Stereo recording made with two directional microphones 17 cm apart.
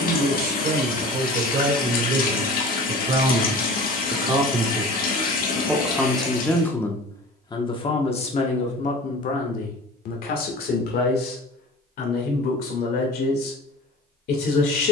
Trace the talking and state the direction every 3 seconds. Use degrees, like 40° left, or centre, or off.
50° right, 20° right, 20° left, 60° left, 70° left.